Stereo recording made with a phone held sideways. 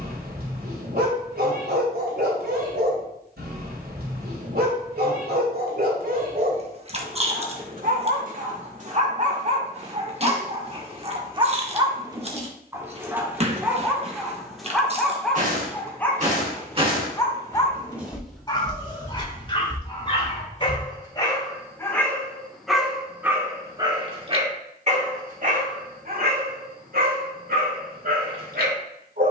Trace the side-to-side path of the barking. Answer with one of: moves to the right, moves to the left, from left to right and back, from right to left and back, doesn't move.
from right to left and back.